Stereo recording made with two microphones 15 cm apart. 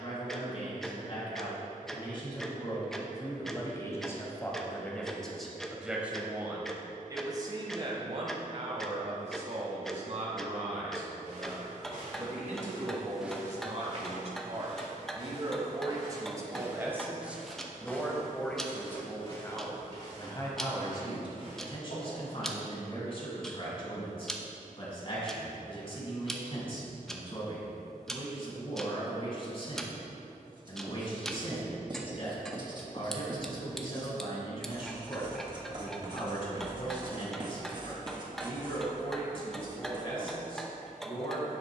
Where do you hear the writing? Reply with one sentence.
You can hear the writing on the right.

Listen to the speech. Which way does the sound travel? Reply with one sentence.
You can hear the speech move from left to right and back again.